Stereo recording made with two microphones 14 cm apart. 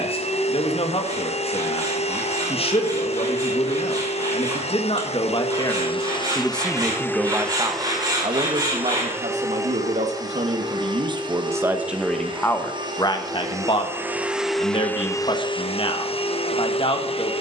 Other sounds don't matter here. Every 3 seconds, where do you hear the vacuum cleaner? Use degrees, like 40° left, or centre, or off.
50° left, 40° left, 10° left, 30° right, 20° right, 40° left.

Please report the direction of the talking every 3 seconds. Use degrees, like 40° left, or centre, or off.
40° left, 40° left, 20° right, 40° right, 30° left, 40° left.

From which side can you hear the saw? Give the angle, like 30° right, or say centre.
30° right.